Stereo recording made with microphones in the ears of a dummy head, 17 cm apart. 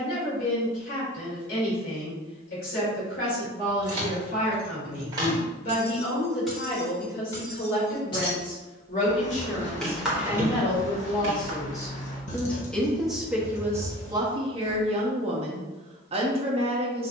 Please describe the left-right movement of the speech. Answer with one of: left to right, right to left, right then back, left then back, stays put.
left to right.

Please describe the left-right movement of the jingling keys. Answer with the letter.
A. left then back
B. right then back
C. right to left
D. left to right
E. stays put
A.